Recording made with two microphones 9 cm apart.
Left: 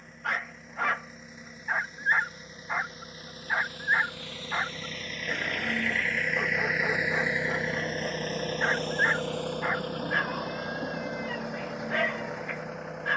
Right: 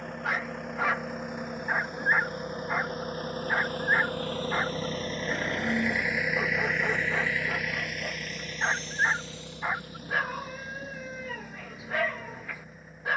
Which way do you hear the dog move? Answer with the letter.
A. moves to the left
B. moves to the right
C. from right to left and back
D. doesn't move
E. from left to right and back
D.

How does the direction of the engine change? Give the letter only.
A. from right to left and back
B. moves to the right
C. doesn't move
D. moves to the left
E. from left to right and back
D.